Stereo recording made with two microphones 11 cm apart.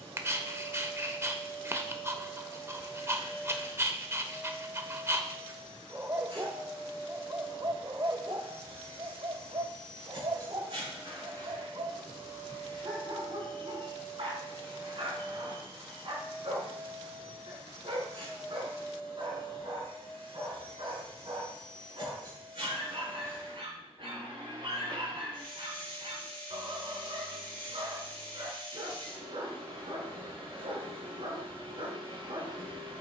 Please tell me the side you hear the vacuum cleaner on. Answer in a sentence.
You can hear the vacuum cleaner on the right.